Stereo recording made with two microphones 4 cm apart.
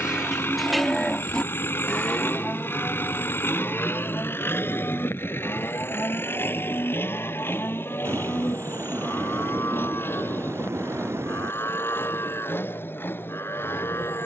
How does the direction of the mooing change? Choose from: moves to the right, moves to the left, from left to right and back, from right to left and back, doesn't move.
moves to the left.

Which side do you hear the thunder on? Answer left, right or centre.
right.